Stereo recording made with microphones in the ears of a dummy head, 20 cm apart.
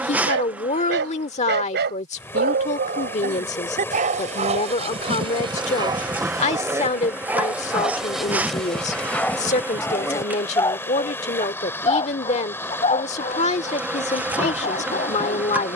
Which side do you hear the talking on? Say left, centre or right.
left.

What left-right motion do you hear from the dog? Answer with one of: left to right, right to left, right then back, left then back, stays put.
right to left.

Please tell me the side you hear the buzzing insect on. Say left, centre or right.
centre.